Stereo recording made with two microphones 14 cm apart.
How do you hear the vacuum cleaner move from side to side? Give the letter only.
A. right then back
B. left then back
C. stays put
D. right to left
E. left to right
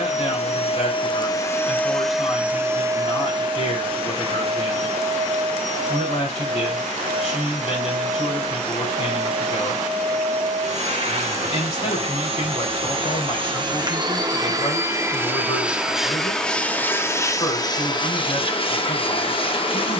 A.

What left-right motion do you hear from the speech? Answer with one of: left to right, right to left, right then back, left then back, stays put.
stays put.